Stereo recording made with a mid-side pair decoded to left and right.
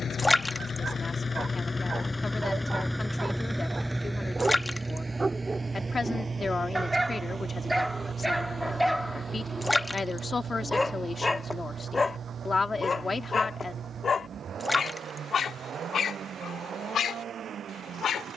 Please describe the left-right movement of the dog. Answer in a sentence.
You can hear the dog go from the right side to the left.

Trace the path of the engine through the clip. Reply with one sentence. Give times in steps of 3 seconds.
In this clip you hear the engine on the left from 0 s and on the right from 3 s.